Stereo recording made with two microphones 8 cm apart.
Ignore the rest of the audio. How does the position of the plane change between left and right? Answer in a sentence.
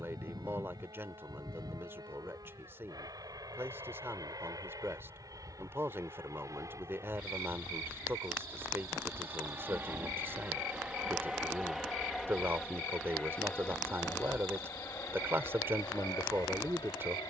In this clip you hear the plane move to the left.